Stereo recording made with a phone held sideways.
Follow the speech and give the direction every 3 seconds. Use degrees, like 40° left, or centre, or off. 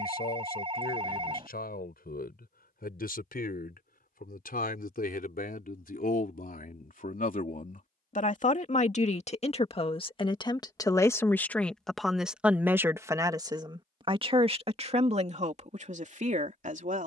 80° left, 70° left, 60° left, 30° left, 20° right, 50° right.